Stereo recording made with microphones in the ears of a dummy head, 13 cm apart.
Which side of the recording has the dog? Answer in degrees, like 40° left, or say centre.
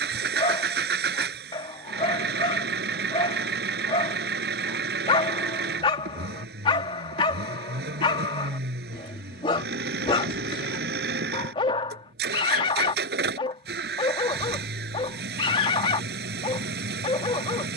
30° left.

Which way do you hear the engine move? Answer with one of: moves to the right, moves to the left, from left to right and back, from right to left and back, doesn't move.
doesn't move.